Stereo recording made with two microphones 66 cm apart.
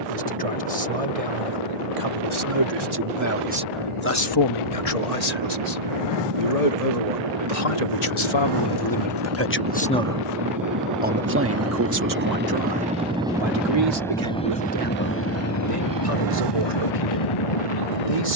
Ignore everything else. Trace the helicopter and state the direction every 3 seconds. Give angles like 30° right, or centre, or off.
60° right, 50° right, 40° right, 30° right, centre, 30° left.